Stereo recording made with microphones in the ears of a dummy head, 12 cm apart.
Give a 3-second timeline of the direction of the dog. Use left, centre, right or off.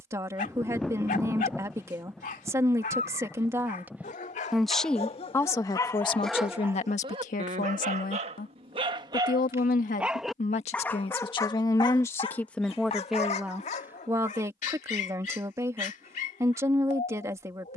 left, left, right, centre, left, left.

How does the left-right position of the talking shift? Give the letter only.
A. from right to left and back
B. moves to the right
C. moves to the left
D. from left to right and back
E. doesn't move
A.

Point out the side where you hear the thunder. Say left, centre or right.
centre.